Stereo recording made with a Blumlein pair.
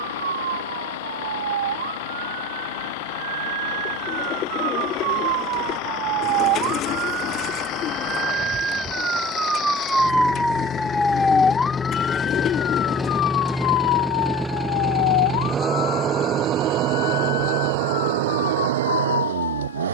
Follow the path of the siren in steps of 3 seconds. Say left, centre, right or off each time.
right, right, right, centre, left, left, left.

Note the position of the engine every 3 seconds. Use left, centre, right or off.
left, left, left, left, centre, right, right.